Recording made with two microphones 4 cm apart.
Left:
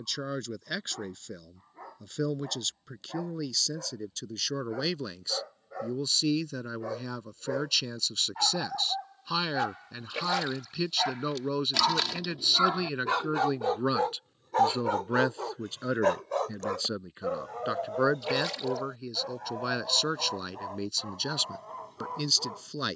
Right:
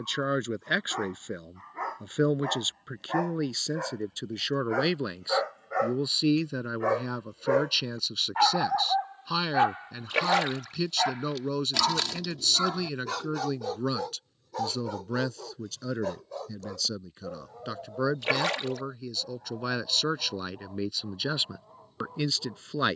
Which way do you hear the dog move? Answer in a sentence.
You can hear the dog move to the left.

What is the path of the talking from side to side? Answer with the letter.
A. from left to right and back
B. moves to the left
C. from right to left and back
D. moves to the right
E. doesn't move
C.